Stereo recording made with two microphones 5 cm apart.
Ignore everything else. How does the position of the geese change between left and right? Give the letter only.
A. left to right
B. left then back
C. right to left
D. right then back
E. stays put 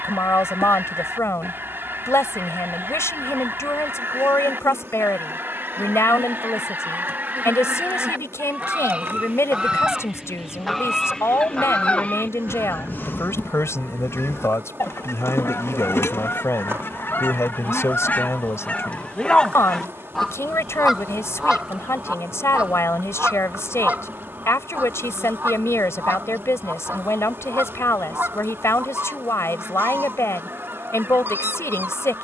B.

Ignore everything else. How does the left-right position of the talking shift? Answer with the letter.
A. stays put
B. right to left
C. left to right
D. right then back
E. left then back
A.